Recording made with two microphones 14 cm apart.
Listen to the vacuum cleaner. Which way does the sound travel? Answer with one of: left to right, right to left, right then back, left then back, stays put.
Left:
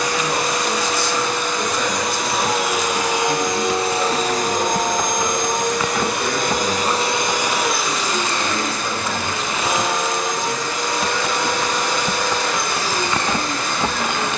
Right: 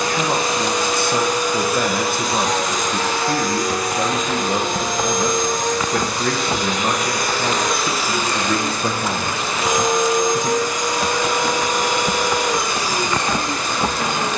left then back.